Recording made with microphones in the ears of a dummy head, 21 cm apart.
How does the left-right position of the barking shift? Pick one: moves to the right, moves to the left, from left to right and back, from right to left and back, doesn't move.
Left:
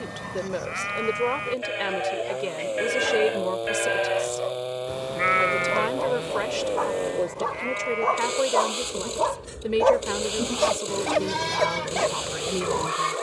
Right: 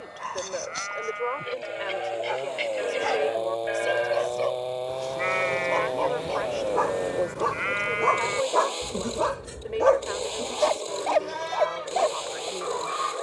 moves to the left.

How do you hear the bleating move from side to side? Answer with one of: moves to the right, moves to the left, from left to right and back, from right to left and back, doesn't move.
from left to right and back.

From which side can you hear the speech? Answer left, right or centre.
left.